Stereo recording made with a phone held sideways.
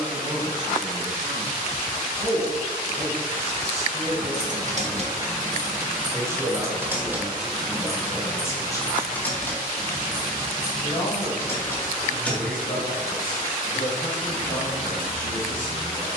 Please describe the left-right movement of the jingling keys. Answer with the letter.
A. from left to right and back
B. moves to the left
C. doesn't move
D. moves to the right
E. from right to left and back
E.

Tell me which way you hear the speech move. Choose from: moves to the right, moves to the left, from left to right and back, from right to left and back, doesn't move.
moves to the left.